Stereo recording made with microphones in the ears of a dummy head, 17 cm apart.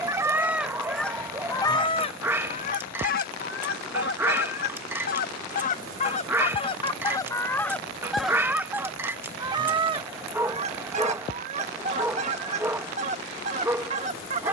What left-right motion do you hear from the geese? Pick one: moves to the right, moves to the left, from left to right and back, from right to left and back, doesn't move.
from right to left and back.